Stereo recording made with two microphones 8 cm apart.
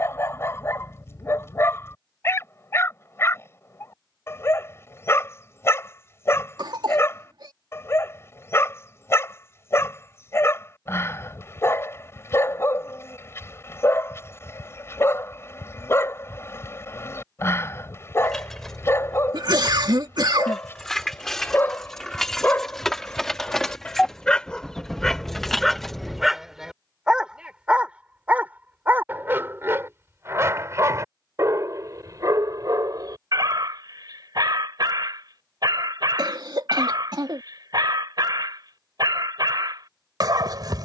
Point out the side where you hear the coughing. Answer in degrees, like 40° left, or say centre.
60° right.